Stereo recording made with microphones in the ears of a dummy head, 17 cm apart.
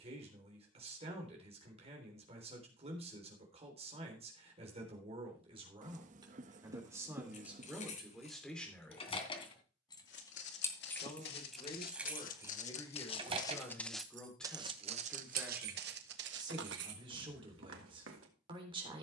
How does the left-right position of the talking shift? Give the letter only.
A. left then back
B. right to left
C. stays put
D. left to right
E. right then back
A.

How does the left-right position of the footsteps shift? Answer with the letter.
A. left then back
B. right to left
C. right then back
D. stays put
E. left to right
E.